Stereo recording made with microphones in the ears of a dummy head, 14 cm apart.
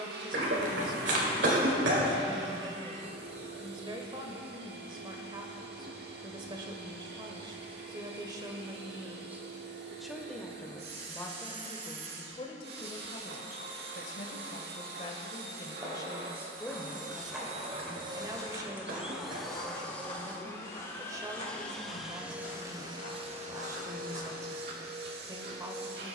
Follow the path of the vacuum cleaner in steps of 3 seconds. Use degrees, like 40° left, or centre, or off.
70° right, 70° right, 70° right, 70° right, 70° right, 60° right, centre, 20° right, 70° right.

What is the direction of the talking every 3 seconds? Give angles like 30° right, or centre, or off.
30° right, 30° right, 30° right, 10° left, 40° left, 10° left, 20° right, 20° right, 20° right.